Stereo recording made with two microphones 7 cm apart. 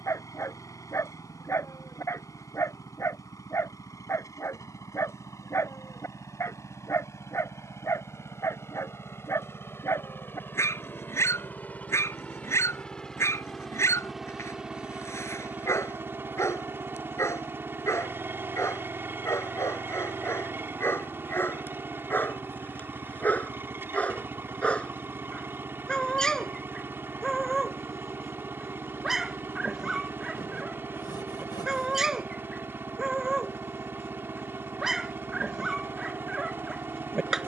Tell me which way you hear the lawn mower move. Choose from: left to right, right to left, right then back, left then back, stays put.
left to right.